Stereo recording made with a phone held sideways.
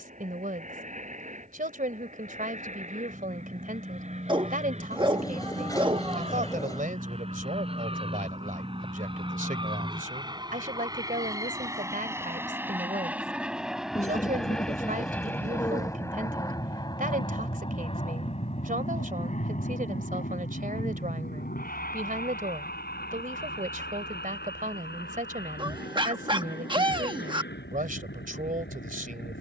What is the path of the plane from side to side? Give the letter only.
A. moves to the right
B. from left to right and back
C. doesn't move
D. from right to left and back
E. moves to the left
E.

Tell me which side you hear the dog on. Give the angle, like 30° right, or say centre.
30° right.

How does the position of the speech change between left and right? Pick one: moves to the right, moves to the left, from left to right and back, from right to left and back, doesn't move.
doesn't move.